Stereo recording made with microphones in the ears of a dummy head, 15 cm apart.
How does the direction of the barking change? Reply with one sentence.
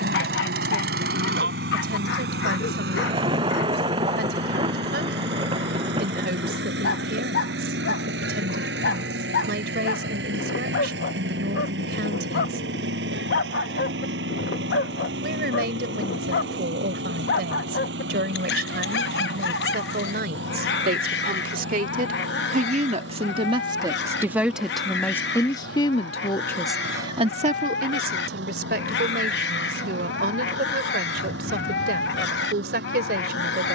You can hear the barking stay put.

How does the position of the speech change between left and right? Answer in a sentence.
You can hear the speech go left and come back.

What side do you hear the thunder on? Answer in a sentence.
You can hear the thunder on the right.